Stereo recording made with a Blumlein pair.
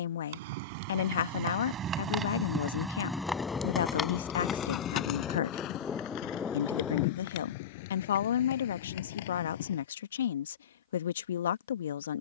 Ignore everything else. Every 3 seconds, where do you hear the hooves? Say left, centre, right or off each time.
right, left, left, left.